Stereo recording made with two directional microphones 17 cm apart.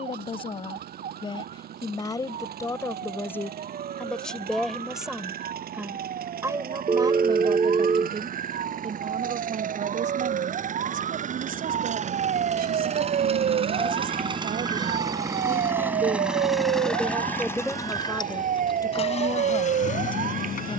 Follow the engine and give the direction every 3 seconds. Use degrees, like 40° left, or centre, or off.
60° right, 60° right, 60° right, 50° right, 30° right, centre, 40° left.